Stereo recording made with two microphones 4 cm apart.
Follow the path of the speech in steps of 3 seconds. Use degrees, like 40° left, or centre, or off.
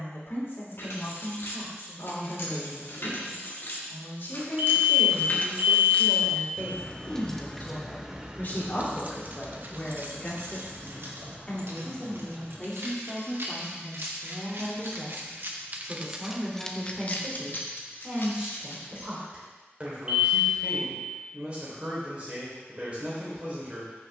60° left, 60° left, 50° left, 30° left, 10° left, 10° right, 20° right, 30° right.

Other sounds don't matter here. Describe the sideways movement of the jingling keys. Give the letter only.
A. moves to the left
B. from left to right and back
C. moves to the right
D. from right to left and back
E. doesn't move
B.